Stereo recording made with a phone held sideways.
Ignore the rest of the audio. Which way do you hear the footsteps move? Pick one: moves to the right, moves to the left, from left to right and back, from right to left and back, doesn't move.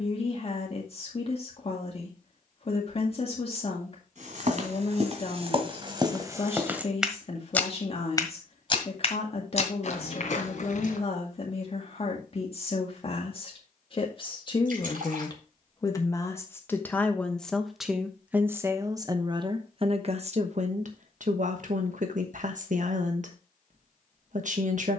moves to the left.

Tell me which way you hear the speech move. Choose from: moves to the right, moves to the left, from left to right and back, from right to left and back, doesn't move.
moves to the right.